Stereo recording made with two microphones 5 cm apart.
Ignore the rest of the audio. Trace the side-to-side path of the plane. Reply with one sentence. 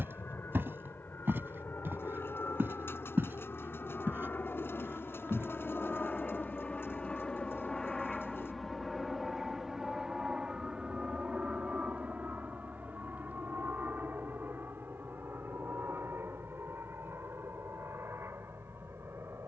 In this clip you hear the plane travel towards the right.